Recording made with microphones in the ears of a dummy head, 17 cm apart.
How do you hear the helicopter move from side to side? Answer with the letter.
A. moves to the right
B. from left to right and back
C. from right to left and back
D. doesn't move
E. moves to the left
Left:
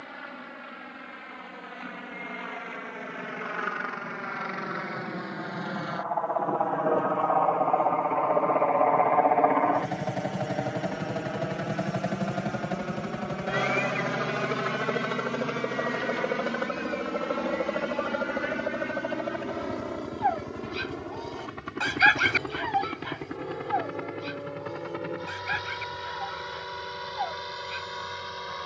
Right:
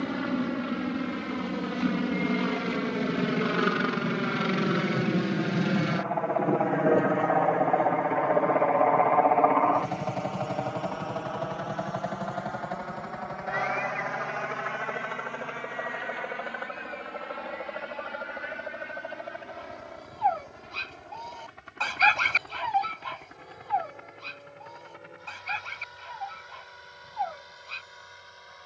E.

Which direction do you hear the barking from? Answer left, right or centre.
centre.